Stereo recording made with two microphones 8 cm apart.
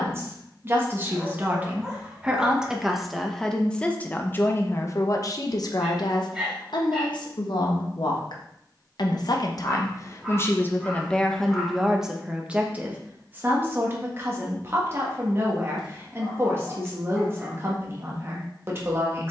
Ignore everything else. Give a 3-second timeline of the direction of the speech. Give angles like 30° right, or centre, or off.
20° right, 30° left, 70° left, 30° left, 20° right, 30° right, 30° right.